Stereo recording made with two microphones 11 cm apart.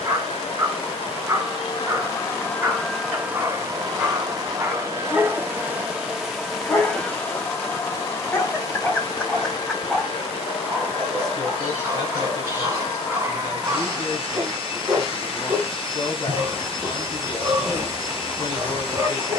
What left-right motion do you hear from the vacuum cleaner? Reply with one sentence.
In this clip you hear the vacuum cleaner go right and come back.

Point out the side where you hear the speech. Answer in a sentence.
In this clip you hear the speech on the left.